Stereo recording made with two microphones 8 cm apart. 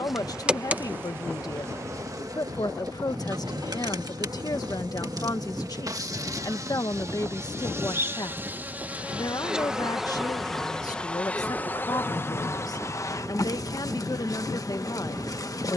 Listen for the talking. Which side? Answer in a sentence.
You can hear the talking on the left.